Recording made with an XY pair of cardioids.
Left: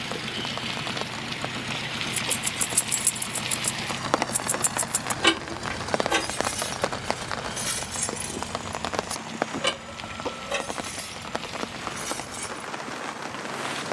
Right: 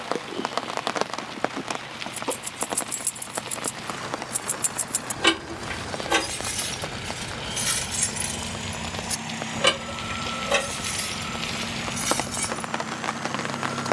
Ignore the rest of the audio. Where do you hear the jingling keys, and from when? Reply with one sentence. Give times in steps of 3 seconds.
You can hear the jingling keys on the left from 0 s, in the centre from 3 s and on the right from 6 s.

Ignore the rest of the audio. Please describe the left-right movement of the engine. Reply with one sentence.
You can hear the engine move from left to right.